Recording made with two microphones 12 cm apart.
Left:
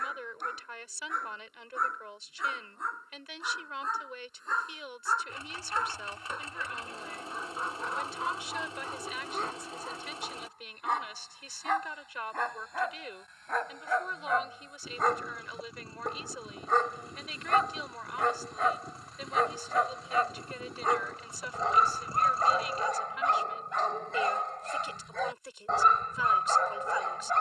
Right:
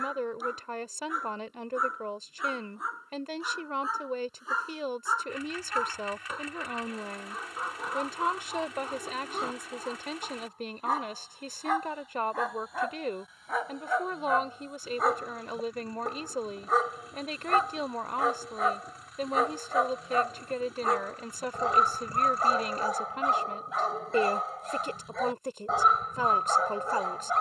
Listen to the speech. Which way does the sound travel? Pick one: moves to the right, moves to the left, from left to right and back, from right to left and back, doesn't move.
doesn't move.